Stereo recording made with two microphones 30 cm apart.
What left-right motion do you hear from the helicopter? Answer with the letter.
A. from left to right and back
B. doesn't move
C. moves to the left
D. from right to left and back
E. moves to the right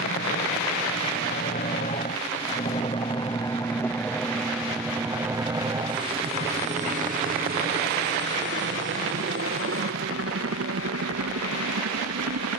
E.